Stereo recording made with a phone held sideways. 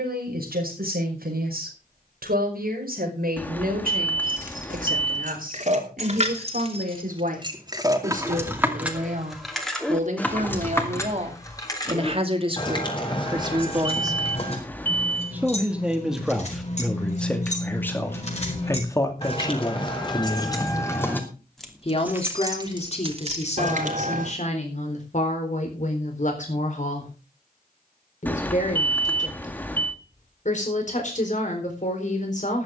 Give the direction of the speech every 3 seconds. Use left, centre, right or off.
right, right, right, right, right, centre, left, left, left, left, left.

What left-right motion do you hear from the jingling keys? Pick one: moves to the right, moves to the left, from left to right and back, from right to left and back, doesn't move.
from right to left and back.